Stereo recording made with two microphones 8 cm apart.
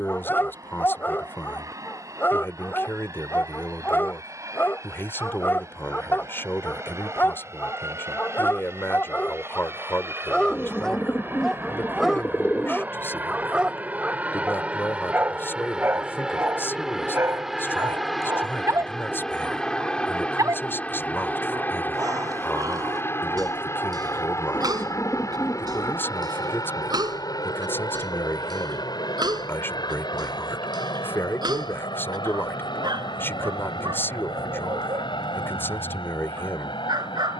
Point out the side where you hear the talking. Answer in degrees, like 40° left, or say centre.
30° left.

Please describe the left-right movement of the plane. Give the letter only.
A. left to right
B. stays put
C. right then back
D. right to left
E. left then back
D.